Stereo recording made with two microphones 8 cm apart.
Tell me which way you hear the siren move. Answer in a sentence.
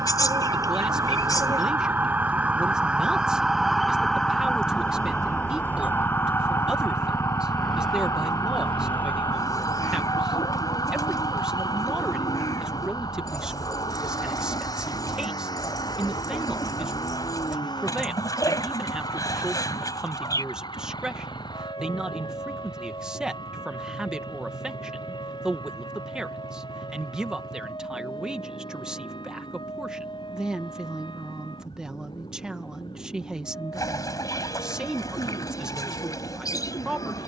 You can hear the siren move from right to left.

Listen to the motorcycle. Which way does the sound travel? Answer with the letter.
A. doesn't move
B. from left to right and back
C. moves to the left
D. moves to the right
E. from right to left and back
C.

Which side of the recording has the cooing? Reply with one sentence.
You can hear the cooing on the left.